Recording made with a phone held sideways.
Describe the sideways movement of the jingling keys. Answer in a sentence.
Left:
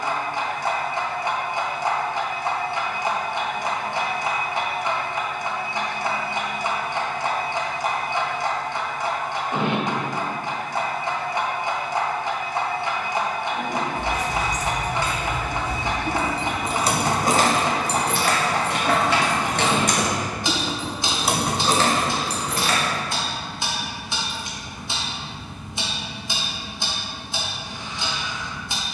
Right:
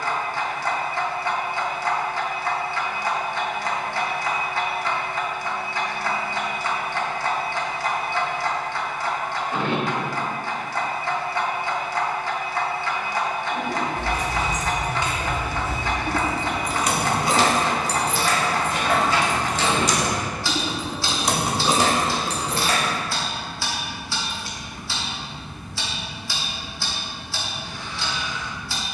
In this clip you hear the jingling keys move from right to left and back again.